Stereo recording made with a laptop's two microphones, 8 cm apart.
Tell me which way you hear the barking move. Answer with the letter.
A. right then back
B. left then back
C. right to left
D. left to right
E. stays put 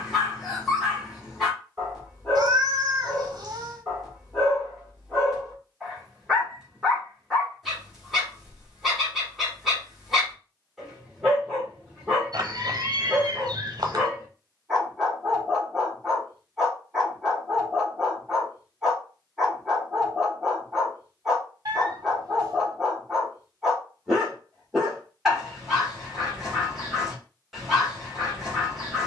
E.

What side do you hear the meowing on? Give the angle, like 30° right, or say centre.
50° right.